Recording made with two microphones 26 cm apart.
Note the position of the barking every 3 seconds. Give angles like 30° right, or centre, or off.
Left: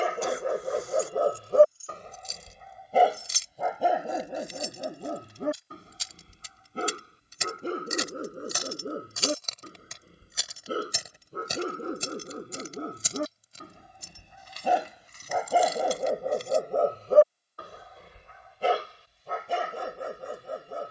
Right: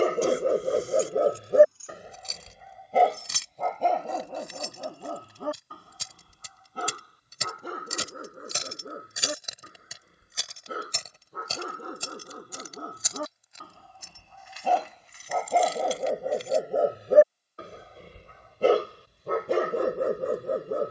20° right, 20° left, 30° left, 30° left, 20° left, 10° right, 60° right.